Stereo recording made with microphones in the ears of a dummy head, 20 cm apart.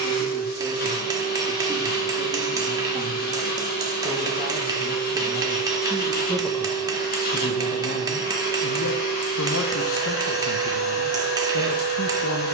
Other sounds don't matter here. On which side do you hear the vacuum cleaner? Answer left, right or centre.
left.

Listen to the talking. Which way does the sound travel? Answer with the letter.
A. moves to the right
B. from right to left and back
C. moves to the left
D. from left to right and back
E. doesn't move
C.